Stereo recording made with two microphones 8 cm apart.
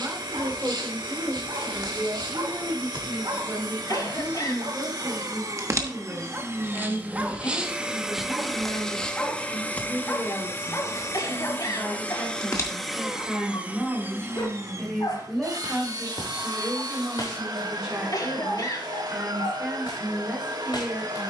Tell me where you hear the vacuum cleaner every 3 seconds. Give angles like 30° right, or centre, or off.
60° right, 50° right, 20° right, 30° left, 10° right, 50° right, 60° right.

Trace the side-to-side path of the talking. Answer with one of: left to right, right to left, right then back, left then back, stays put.
left then back.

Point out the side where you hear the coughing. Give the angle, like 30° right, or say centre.
50° left.